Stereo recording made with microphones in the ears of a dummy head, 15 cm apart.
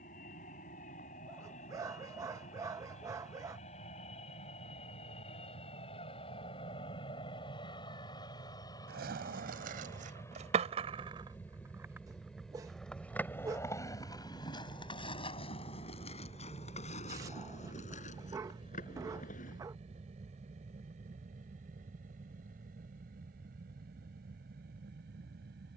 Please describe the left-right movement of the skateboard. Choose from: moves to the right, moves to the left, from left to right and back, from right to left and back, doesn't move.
moves to the left.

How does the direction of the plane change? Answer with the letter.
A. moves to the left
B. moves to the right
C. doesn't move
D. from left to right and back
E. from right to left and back
B.